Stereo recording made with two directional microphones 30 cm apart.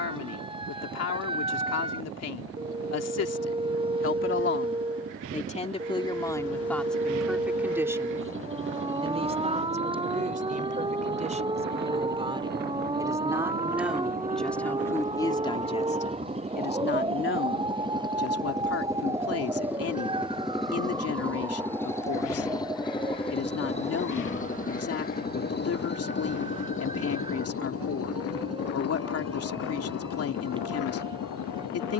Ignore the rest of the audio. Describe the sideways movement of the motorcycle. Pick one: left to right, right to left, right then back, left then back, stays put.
right to left.